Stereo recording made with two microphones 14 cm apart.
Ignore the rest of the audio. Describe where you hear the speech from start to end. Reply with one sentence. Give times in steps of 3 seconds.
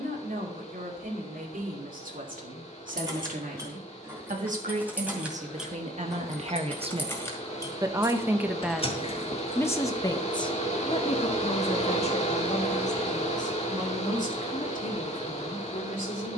You can hear the speech on the right from 0 s and on the left from 9 s.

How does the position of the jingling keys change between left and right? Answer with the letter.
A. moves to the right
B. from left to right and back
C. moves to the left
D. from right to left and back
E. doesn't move
C.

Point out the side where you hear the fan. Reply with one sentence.
You can hear the fan on the left.